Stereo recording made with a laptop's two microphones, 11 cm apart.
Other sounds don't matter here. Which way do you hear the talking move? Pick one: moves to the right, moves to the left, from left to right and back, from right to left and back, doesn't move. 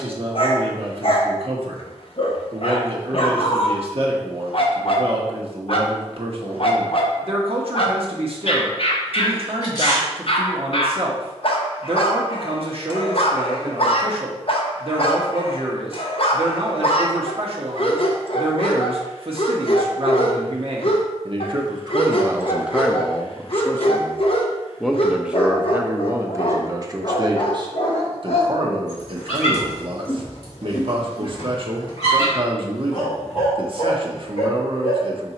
from right to left and back.